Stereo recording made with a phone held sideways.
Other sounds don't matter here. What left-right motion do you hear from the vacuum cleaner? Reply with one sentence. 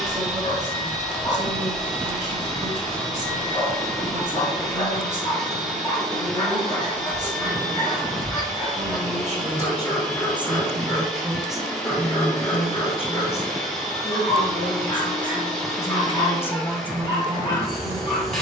In this clip you hear the vacuum cleaner stay put.